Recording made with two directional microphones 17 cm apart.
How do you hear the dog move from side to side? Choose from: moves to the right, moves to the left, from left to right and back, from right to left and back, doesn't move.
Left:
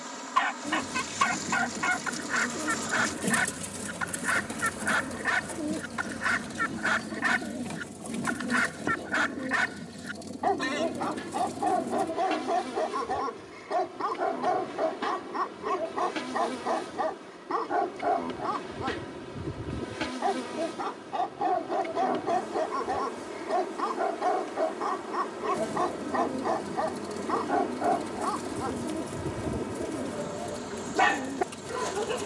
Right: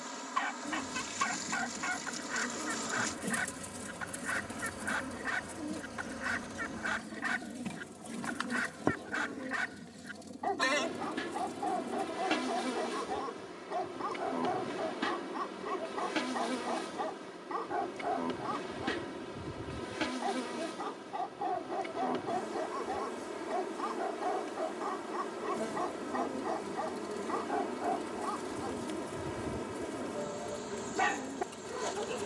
doesn't move.